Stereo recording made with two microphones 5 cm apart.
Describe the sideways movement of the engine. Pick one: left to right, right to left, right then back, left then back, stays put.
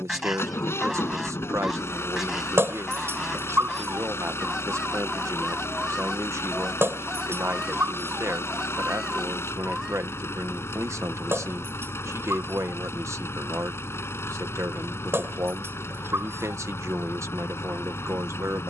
stays put.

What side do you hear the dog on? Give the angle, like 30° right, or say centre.
50° right.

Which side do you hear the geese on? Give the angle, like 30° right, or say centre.
10° right.